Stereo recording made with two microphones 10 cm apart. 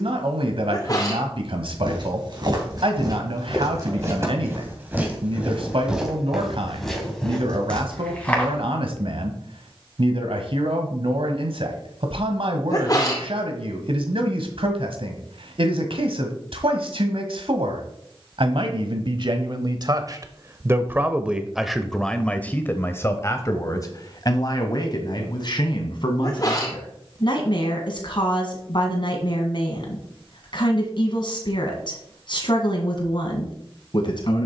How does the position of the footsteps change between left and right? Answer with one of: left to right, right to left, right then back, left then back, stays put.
right to left.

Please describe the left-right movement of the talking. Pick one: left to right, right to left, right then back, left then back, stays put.
right to left.